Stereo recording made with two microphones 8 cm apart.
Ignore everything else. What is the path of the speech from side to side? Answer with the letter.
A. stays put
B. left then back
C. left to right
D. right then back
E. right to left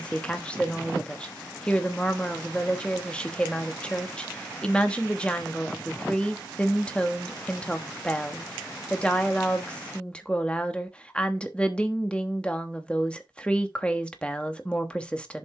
A.